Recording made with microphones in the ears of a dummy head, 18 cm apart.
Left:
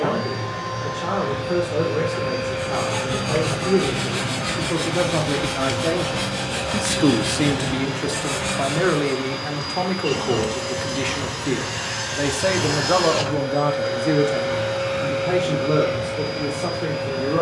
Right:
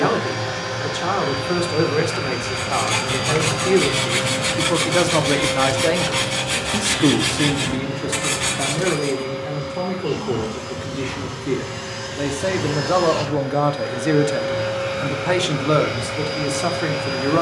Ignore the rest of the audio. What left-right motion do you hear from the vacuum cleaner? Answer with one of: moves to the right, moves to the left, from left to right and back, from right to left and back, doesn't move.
from right to left and back.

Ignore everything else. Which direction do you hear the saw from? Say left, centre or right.
right.